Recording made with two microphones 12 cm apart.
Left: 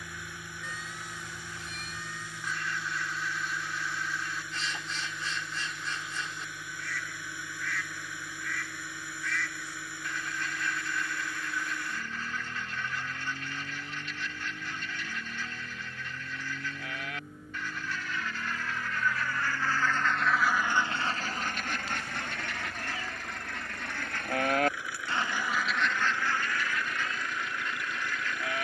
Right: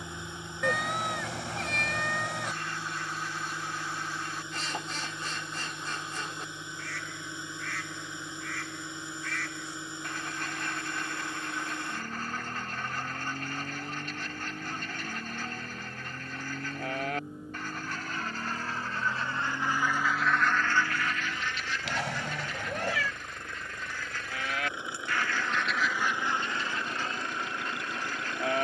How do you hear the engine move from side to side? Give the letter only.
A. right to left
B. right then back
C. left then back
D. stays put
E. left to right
D.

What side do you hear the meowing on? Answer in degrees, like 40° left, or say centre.
80° right.